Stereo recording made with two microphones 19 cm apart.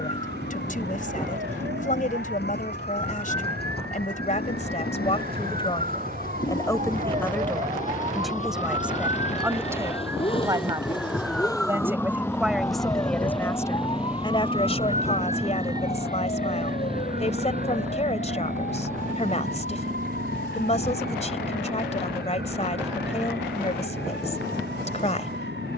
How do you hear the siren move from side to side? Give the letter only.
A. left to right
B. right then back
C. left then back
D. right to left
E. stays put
D.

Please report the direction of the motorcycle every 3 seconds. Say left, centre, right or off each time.
left, left, left, left, centre, right, right, right, right.